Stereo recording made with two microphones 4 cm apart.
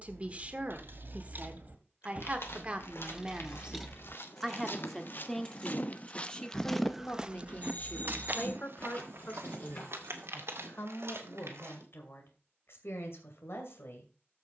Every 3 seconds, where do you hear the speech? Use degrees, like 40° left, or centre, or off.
30° right, 10° right, 30° left, 60° left, 60° left.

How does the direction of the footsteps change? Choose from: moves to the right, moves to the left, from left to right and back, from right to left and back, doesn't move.
moves to the right.